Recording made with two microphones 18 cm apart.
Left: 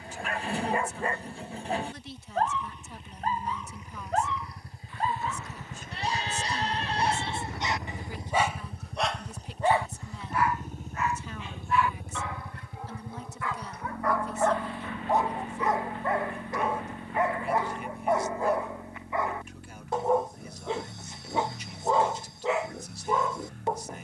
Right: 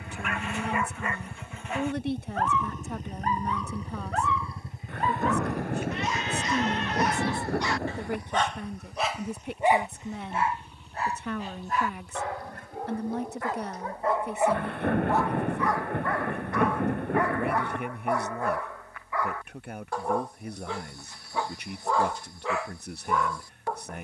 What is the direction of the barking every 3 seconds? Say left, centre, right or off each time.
left, left, left, right, right, left, left, left.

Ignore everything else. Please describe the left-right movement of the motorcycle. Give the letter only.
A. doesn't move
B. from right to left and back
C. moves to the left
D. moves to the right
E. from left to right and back
C.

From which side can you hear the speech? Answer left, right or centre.
right.